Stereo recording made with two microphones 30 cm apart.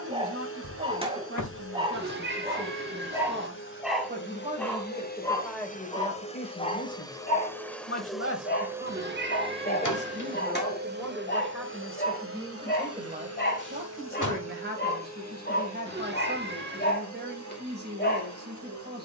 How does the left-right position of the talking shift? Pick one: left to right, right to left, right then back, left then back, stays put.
left then back.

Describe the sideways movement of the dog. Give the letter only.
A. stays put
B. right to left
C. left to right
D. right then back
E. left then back
B.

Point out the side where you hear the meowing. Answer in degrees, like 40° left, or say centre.
40° right.